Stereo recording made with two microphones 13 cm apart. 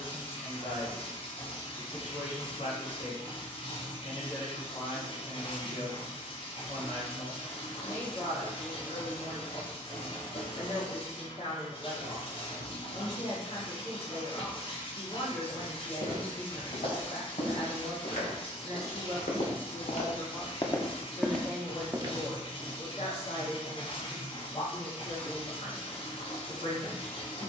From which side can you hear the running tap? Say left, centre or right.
left.